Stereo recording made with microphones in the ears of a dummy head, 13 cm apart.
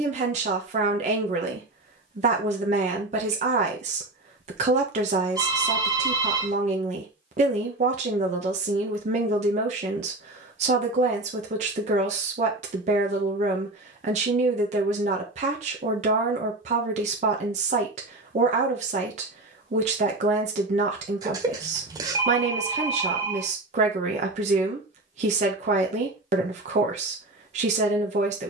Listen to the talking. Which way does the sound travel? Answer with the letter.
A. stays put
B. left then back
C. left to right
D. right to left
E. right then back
A.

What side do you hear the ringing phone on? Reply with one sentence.
You can hear the ringing phone on the right.